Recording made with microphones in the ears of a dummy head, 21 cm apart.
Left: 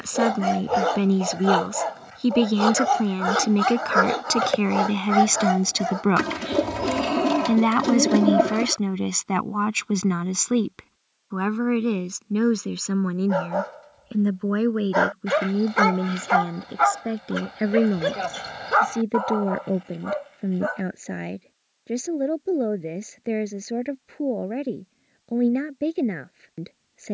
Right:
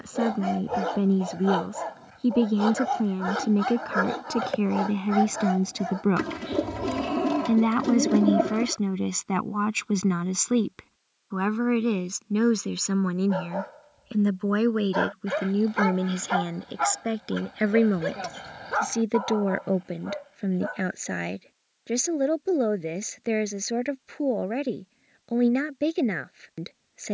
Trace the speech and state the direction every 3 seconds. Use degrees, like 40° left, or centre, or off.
60° left, 50° left, 20° left, centre, 10° right, 30° right, 30° right, 40° right, 40° right.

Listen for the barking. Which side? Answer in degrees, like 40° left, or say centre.
40° left.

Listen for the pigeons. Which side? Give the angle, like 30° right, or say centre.
40° left.